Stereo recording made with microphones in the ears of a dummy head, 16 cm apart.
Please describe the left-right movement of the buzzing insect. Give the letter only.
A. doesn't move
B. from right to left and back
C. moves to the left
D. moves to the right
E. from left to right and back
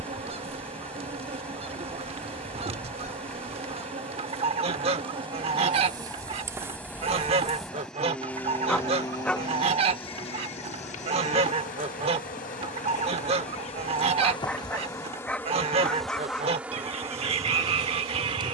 B.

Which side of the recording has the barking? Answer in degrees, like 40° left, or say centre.
10° left.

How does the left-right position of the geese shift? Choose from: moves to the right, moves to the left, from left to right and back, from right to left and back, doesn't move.
doesn't move.